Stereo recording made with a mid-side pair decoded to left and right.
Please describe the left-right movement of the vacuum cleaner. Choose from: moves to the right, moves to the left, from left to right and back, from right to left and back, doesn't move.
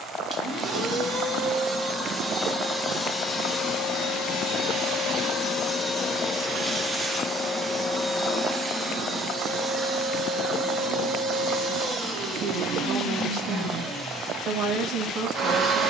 from right to left and back.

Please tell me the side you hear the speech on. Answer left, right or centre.
right.